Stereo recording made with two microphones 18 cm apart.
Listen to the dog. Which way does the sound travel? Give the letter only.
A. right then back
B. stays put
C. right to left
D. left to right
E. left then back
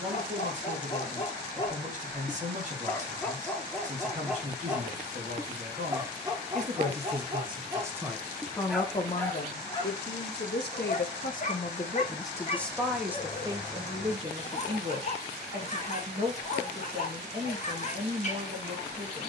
A.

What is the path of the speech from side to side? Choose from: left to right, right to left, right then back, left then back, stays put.
left then back.